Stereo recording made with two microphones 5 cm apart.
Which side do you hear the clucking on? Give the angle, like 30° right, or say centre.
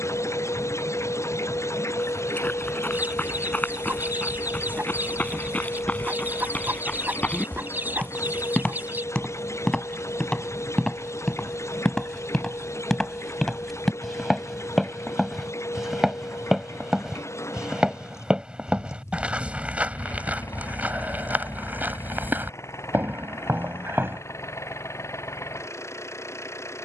40° right.